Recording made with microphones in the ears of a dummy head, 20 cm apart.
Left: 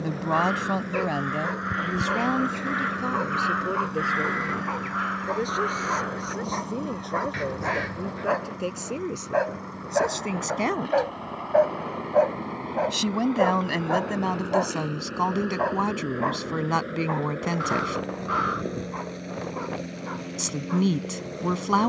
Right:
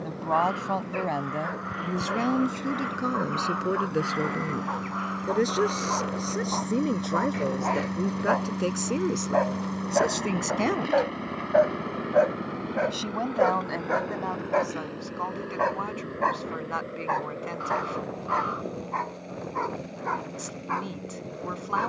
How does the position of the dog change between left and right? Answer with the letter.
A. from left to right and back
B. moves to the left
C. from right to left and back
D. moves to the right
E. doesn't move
D.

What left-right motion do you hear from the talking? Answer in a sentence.
You can hear the talking go right and come back.